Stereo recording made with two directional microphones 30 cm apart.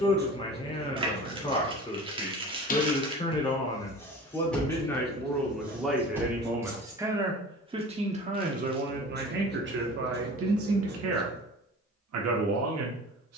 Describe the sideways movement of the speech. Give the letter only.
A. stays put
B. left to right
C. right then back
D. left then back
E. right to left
B.